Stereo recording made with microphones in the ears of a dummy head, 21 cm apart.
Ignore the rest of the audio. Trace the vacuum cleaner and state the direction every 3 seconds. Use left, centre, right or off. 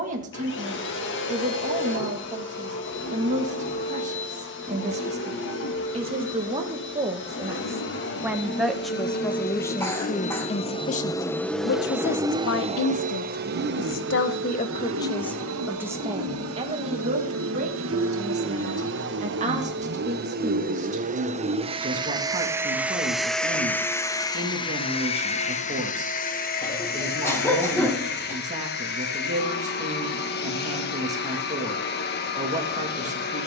left, left, left, left, right, right, right, centre, left, left, left.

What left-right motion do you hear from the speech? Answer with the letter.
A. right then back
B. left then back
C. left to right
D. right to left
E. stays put
B.